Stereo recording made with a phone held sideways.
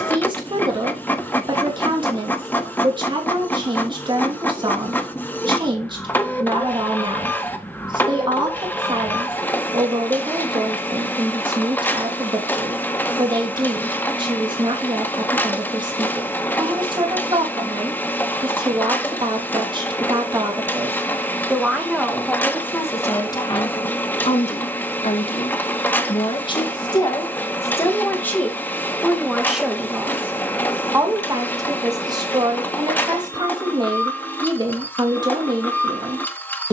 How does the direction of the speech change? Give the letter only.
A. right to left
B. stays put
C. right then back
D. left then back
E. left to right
D.